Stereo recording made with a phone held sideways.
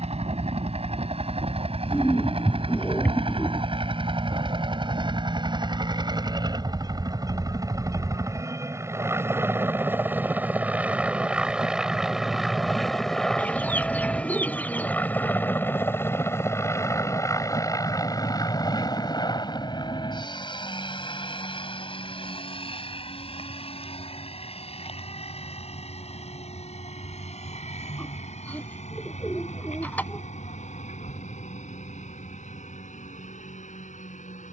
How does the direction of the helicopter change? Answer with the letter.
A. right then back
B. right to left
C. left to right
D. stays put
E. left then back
B.